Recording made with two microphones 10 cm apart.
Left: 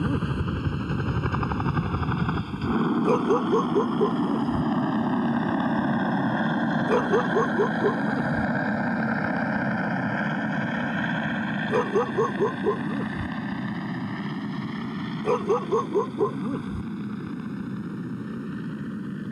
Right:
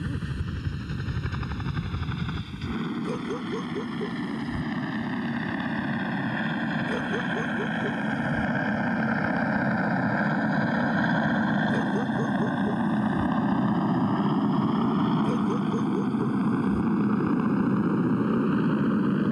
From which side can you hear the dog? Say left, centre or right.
left.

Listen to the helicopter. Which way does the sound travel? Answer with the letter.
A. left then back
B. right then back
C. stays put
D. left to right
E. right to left
D.